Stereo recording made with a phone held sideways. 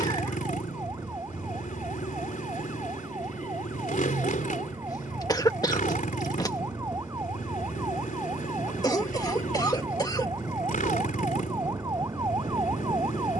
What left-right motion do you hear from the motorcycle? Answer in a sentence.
You can hear the motorcycle stay in one place.